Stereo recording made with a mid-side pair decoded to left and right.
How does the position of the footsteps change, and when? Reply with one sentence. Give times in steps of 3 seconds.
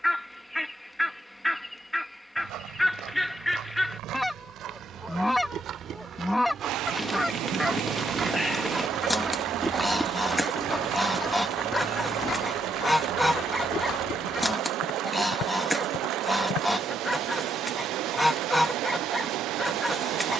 In this clip you hear the footsteps on the right from 0 s, in the centre from 9 s, on the left from 12 s and not at all from 18 s.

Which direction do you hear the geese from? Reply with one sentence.
In this clip you hear the geese in the centre.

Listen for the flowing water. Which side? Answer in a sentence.
You can hear the flowing water on the right.